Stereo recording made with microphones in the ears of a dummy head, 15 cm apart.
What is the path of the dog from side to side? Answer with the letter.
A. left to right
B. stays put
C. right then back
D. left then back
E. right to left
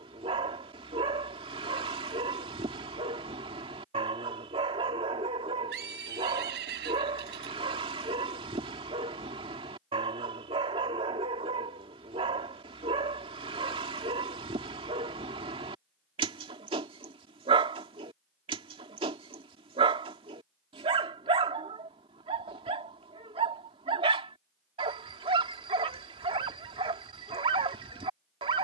B.